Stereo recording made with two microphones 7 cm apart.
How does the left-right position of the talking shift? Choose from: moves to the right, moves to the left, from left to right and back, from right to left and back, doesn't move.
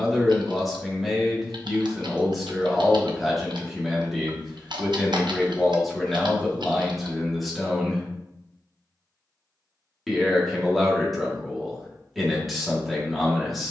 doesn't move.